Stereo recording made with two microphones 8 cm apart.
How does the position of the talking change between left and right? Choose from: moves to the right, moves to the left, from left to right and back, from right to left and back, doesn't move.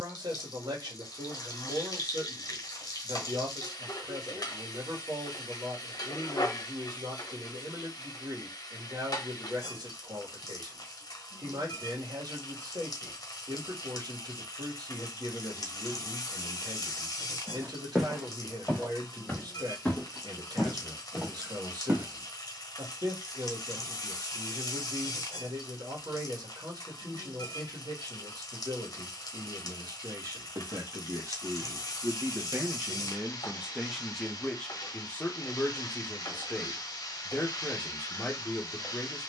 moves to the left.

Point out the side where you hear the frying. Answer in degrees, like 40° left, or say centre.
50° left.